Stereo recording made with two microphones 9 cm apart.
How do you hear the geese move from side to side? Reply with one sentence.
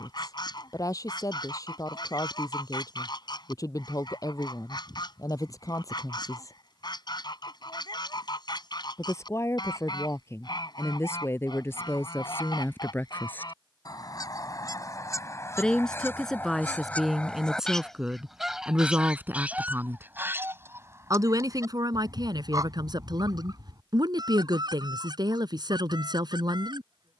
In this clip you hear the geese move to the right.